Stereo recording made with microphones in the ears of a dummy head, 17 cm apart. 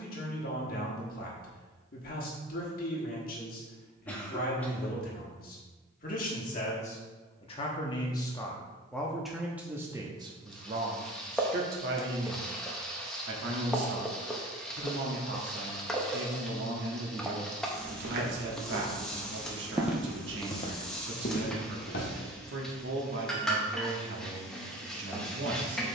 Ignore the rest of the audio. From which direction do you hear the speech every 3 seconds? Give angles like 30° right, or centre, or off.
50° left, 50° left, 30° left, 20° right, 60° right, 60° right, 60° right, 60° right, 60° right.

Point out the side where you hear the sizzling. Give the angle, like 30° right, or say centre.
centre.